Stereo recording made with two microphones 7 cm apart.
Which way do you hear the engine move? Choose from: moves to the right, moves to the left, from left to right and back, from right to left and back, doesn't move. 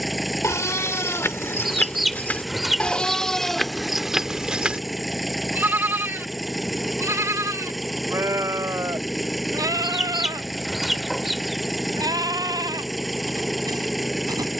doesn't move.